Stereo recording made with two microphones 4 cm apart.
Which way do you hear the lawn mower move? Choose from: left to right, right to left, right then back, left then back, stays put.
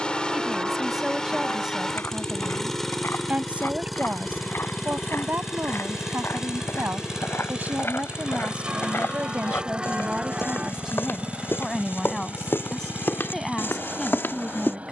left to right.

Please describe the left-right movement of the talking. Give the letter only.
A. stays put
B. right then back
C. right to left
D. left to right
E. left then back
B.